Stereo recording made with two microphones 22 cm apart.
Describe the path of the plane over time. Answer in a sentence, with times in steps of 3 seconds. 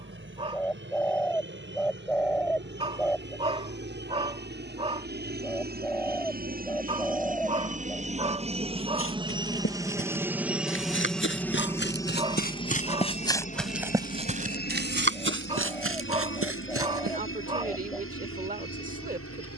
In this clip you hear the plane on the right from 0 s, in the centre from 9 s and on the left from 12 s.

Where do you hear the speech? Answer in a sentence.
You can hear the speech on the right.